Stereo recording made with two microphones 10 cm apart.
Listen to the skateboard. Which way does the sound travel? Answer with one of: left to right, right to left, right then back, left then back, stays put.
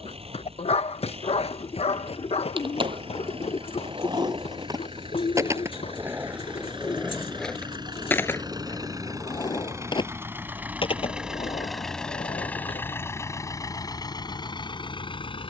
right to left.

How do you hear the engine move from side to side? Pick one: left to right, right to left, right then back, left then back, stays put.
right to left.